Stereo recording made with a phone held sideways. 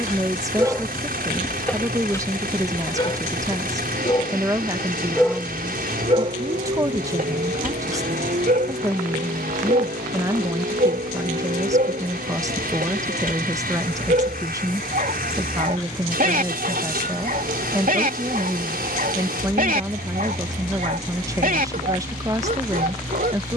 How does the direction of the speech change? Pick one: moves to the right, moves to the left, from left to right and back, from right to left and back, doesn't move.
doesn't move.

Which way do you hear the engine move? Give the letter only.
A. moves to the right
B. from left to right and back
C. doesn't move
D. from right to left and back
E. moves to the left
C.